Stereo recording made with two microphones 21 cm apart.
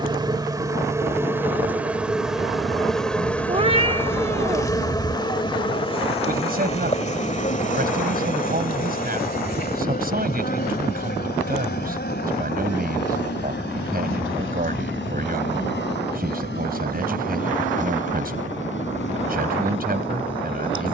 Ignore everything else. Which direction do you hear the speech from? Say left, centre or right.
right.